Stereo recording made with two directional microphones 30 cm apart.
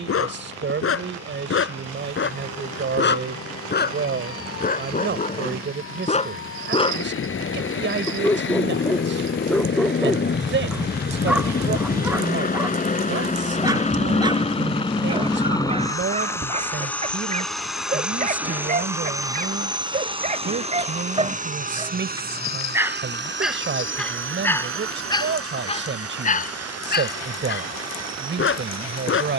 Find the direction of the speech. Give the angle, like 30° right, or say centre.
40° right.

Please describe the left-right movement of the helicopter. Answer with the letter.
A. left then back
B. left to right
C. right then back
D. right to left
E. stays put
B.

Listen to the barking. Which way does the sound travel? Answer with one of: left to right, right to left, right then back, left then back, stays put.
right then back.